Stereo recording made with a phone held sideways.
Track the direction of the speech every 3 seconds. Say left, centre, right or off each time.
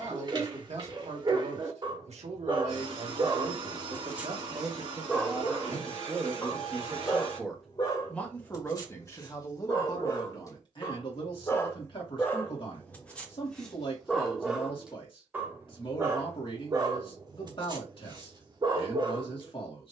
right, right, centre, left, left, left, left.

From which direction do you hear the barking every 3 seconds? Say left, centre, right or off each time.
right, centre, left, left, centre, right, right.